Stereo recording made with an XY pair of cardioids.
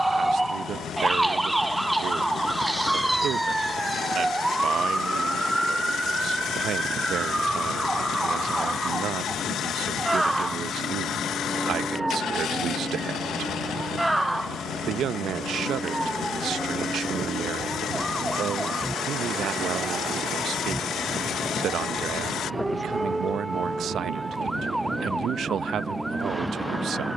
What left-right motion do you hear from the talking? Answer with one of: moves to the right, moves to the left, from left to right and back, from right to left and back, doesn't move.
doesn't move.